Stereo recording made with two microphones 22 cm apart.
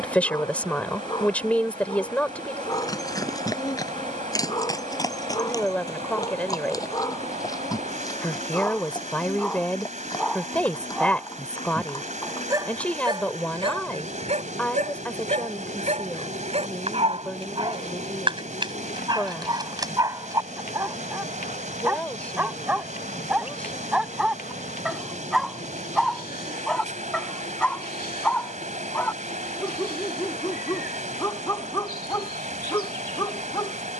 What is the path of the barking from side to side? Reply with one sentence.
In this clip you hear the barking go right and come back.